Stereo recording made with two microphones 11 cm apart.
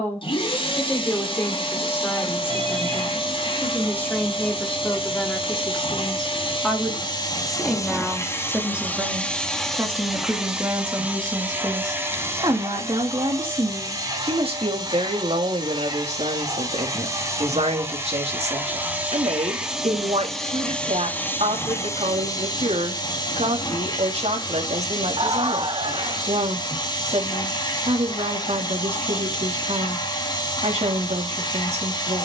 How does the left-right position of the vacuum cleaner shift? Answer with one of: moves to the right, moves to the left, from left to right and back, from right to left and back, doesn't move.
from left to right and back.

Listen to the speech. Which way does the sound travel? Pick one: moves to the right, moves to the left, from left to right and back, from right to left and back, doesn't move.
moves to the right.